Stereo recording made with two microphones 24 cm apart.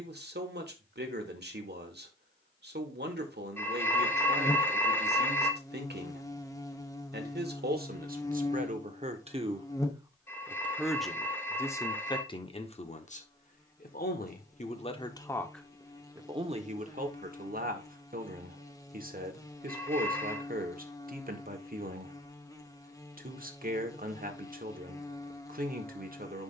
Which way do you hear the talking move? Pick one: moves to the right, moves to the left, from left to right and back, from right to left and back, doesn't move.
from right to left and back.